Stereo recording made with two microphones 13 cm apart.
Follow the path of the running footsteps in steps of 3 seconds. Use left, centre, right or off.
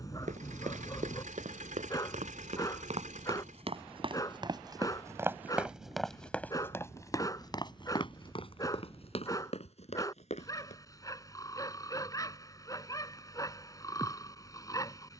right, right, left, left, off.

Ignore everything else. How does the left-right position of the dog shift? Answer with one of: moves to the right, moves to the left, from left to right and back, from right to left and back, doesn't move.
doesn't move.